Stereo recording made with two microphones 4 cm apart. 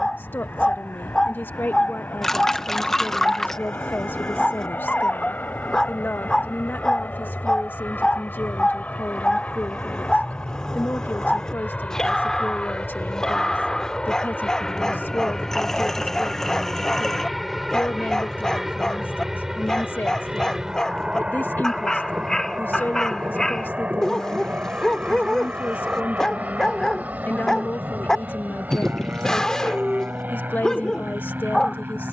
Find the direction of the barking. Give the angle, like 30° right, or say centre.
20° left.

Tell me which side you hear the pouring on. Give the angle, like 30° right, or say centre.
10° left.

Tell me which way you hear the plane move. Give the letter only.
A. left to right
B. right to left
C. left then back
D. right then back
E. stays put
A.